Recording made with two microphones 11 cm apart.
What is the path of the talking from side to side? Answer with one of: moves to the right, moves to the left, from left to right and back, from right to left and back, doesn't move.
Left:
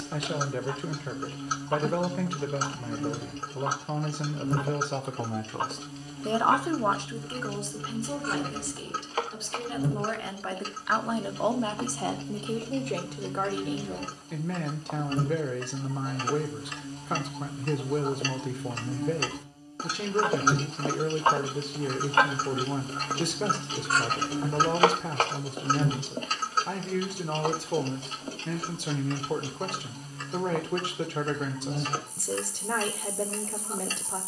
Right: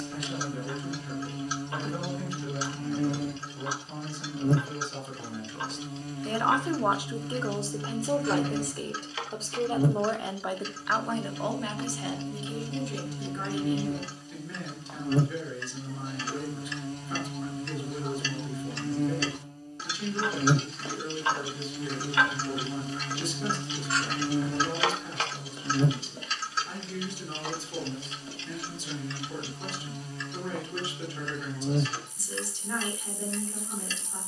from left to right and back.